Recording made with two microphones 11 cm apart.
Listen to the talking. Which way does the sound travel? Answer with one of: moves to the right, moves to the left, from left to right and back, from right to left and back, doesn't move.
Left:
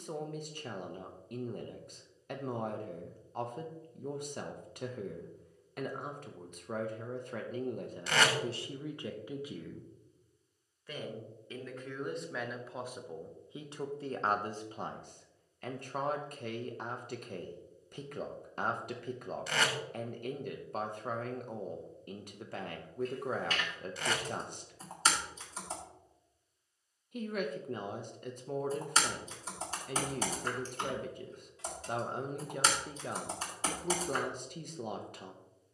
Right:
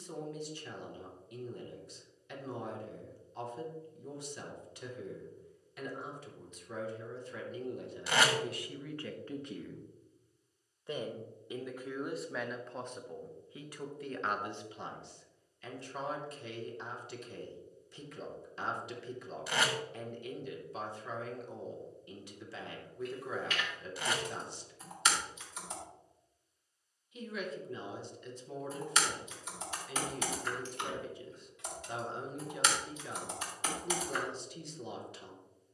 from left to right and back.